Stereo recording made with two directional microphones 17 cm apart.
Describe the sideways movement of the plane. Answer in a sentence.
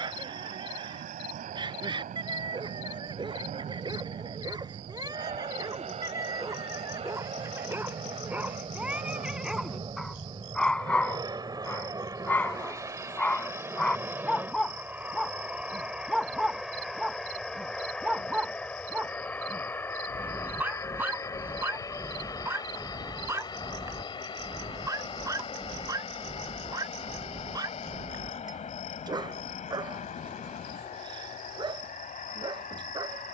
In this clip you hear the plane go from the right side to the left.